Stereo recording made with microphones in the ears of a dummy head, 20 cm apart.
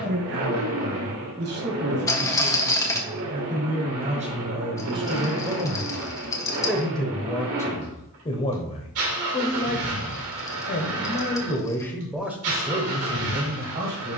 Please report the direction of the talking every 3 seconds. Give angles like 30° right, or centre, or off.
50° right, 30° right, 10° left, 30° left, 30° right.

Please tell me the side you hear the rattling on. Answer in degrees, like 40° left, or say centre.
10° left.